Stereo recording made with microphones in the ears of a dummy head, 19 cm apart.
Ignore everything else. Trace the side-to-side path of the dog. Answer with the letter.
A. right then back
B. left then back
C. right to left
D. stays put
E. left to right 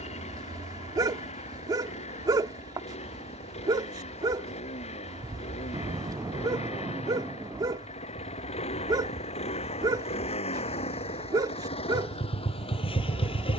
D.